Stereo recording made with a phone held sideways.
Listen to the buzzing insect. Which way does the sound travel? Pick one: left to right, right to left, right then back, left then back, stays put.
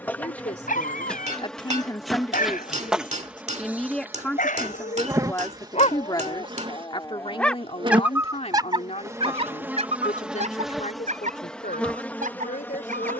right then back.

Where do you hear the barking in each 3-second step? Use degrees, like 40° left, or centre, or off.
70° left, 70° left, 10° left, 50° right, 70° right.